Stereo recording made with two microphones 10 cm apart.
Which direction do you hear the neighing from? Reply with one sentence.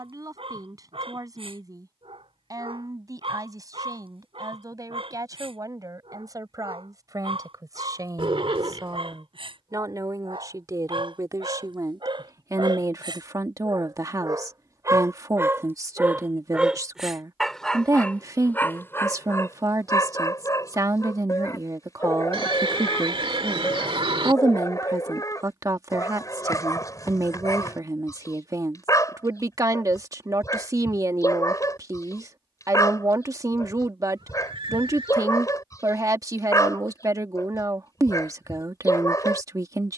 You can hear the neighing on the right.